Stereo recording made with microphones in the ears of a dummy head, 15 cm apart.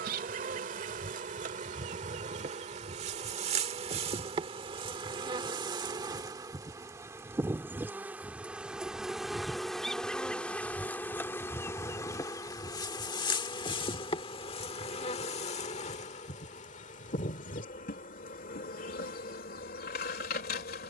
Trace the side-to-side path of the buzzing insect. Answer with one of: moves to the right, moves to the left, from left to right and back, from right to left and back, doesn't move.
moves to the left.